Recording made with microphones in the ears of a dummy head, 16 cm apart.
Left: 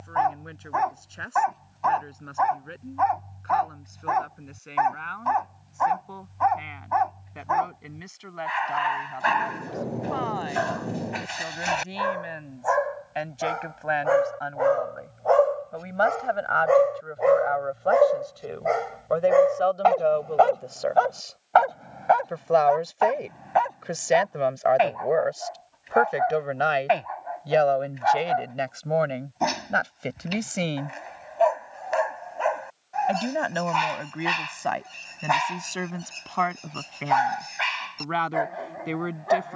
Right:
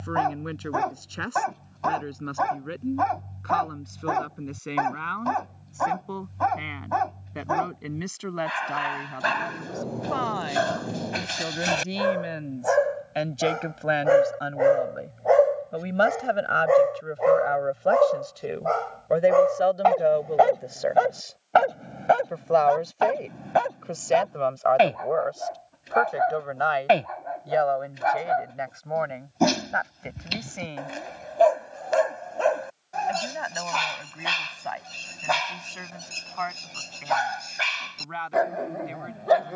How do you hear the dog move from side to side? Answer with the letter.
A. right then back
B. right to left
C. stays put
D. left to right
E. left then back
E.